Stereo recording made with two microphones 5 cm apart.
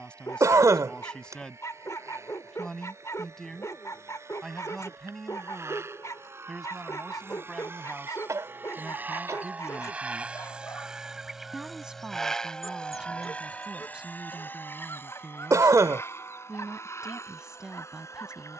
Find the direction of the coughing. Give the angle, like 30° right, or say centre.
80° right.